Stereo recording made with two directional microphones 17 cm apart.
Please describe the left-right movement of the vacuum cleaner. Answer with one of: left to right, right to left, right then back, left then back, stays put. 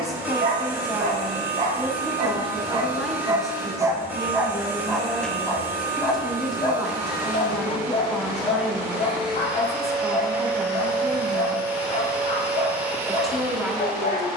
stays put.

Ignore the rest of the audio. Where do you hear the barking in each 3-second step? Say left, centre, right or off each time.
right, centre, left, left, left.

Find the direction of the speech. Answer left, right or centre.
centre.